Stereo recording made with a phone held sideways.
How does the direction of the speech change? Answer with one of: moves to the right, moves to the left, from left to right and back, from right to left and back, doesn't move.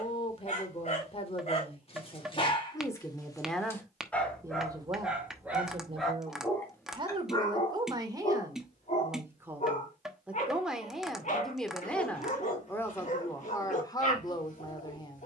from left to right and back.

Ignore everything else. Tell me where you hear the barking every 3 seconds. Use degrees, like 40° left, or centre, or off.
40° left, centre, 20° left, 50° left, 50° left.